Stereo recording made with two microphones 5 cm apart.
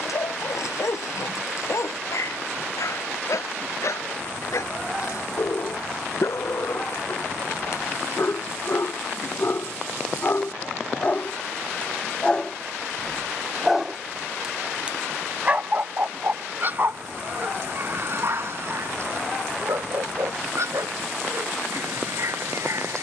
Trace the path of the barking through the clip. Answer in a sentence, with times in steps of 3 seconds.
In this clip you hear the barking on the left from 0 s, in the centre from 12 s and on the right from 15 s.